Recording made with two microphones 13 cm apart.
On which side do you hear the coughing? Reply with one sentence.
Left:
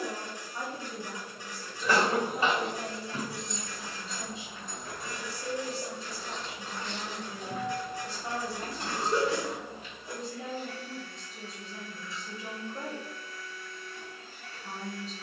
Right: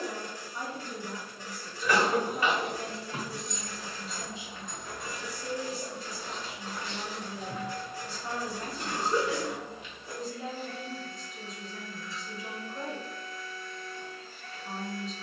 In this clip you hear the coughing on the left.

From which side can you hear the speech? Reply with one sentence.
In this clip you hear the speech on the left.